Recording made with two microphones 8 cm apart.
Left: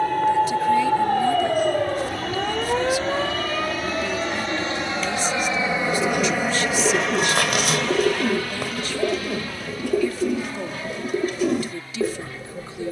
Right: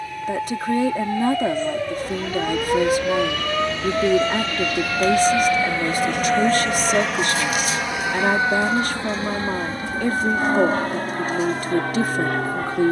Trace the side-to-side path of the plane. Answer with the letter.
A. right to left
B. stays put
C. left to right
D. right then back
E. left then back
C.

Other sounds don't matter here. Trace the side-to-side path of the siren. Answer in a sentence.
In this clip you hear the siren go from the left side to the right.